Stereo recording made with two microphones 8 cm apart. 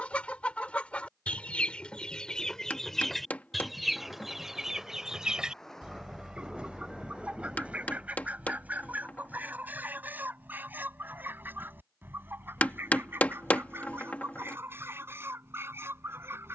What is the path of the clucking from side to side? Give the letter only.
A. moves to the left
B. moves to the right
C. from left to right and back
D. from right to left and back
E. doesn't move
B.